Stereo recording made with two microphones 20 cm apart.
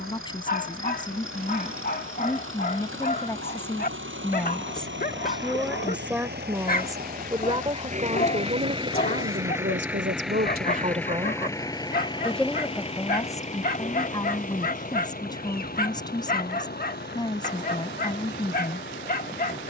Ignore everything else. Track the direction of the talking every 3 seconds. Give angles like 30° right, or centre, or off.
20° left, 10° left, 20° right, 40° right, 10° left, 20° left, 20° left.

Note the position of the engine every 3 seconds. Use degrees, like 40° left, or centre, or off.
80° right, 60° right, 40° right, centre, 30° left, 50° left, 50° left.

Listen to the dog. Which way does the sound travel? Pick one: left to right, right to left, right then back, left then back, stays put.
stays put.